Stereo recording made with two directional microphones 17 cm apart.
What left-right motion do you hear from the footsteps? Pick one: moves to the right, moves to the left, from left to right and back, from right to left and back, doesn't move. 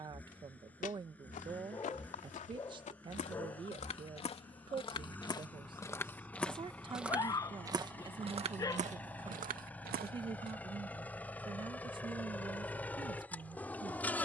moves to the right.